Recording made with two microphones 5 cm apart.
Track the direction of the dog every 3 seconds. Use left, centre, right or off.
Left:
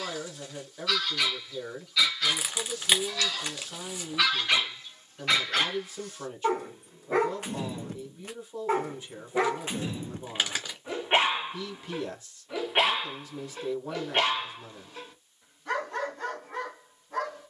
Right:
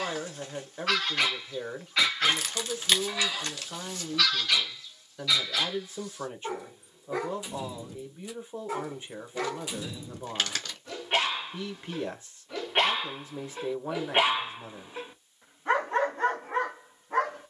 right, left, left, left, centre, right.